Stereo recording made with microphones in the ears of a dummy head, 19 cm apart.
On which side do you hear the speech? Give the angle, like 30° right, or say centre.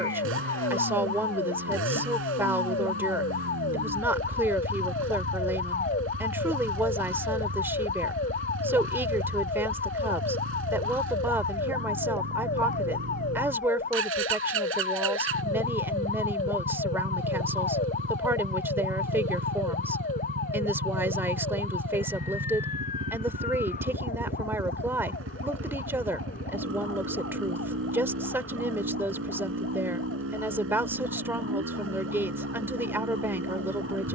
10° right.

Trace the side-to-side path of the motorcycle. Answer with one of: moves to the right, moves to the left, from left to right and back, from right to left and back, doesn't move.
doesn't move.